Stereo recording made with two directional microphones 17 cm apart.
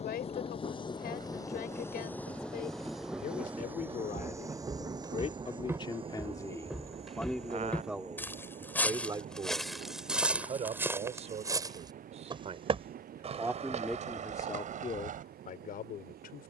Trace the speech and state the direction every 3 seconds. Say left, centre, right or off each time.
left, left, centre, right, centre, left.